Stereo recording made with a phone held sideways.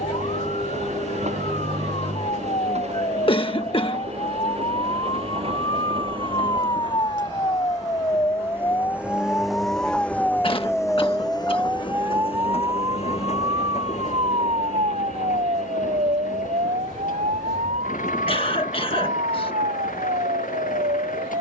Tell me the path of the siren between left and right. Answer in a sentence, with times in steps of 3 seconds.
In this clip you hear the siren on the left from 0 s, in the centre from 9 s and on the right from 12 s.